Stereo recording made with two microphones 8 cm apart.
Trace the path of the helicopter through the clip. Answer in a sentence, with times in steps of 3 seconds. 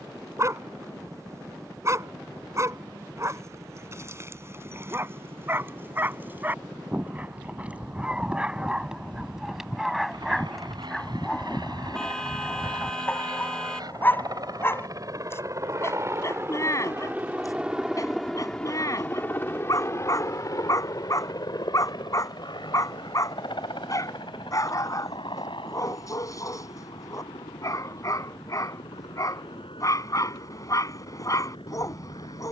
In this clip you hear the helicopter on the right from 0 s and on the left from 18 s.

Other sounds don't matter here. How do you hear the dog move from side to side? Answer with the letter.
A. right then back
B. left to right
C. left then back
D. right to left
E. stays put
D.